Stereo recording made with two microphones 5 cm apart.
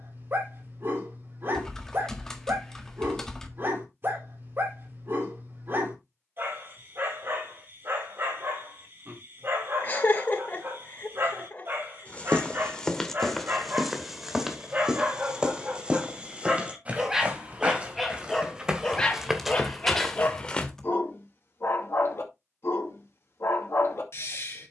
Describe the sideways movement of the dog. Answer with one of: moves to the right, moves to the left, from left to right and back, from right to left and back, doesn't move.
moves to the left.